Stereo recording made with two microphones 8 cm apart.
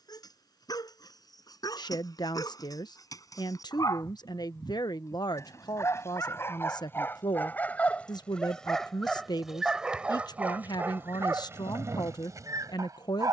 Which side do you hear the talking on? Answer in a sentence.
You can hear the talking on the left.